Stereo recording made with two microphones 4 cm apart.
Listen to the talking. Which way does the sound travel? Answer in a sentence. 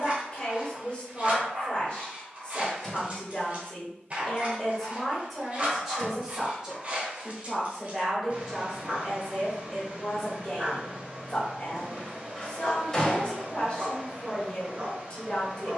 In this clip you hear the talking move from left to right and back again.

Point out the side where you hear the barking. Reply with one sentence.
You can hear the barking on the right.